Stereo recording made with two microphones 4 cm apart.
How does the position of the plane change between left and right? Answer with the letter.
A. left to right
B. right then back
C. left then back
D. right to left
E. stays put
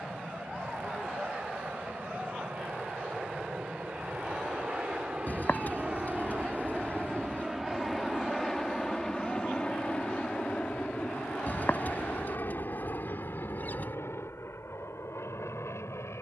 D.